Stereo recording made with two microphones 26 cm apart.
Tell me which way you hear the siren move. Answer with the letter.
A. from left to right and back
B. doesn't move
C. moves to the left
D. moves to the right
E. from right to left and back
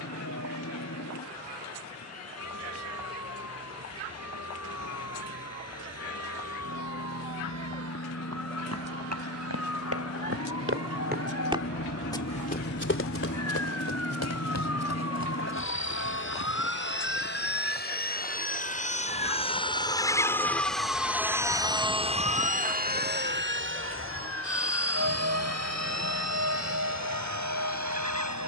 D.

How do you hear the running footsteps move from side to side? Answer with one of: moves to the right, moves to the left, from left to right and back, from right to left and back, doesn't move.
moves to the left.